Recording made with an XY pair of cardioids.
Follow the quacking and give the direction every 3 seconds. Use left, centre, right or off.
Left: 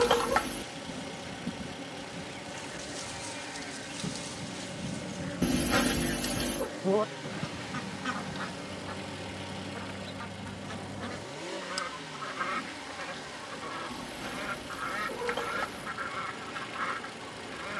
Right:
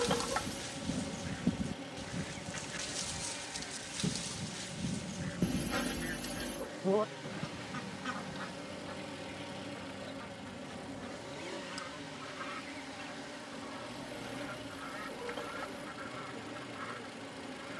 right, centre, left, left, left, left.